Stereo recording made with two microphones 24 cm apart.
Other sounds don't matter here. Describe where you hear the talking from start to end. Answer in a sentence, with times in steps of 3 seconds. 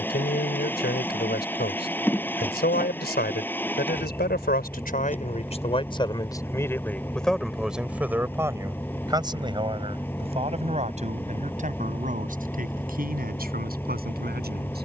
In this clip you hear the talking on the left from 0 s, in the centre from 6 s and on the right from 9 s.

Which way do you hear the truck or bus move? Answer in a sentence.
In this clip you hear the truck or bus stay in one place.